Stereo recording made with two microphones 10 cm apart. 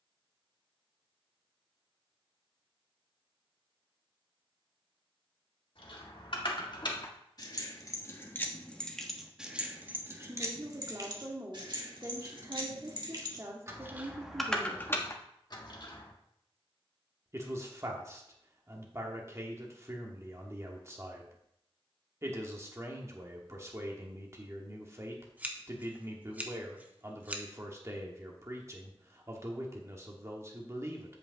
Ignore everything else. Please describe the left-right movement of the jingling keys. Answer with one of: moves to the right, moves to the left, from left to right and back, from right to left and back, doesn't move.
from left to right and back.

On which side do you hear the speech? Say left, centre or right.
right.